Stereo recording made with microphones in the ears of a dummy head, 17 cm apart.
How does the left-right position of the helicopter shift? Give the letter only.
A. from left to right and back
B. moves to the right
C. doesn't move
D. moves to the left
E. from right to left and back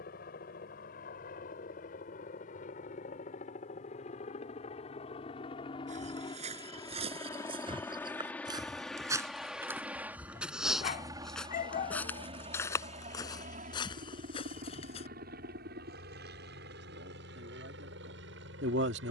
B.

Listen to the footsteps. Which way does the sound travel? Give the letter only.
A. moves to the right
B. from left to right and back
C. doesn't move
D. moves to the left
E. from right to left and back
D.